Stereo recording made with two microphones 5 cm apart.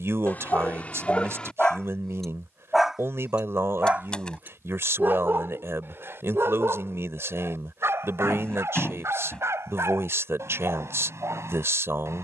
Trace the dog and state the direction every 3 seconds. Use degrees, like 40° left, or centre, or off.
20° left, 40° right, 60° right, 70° right.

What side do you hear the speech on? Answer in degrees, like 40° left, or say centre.
70° right.